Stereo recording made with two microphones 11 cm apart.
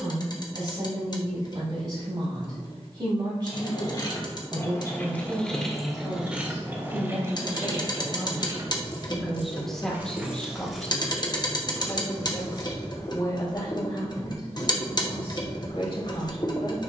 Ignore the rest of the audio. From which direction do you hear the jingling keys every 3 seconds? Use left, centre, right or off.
off, left, right, centre, left, off.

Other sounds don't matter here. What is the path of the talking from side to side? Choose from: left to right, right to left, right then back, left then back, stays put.
right to left.